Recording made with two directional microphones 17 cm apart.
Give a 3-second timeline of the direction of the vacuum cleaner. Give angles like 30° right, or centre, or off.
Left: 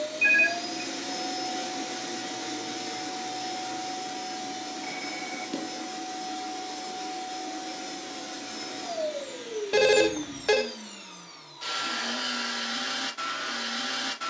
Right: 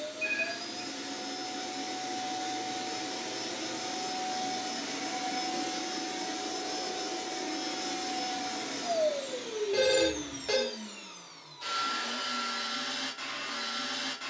30° left, 10° right, 30° right, centre, 30° left.